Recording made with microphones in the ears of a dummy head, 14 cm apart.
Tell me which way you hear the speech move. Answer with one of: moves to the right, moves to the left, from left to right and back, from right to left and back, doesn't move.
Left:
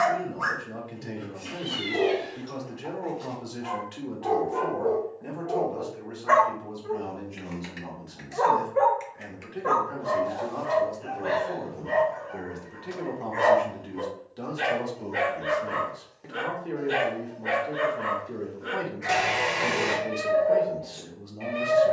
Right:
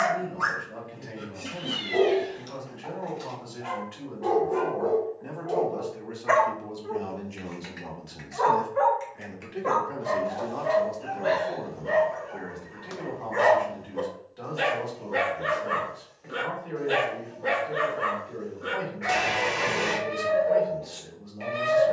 from left to right and back.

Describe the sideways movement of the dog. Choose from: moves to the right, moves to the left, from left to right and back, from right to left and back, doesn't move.
from right to left and back.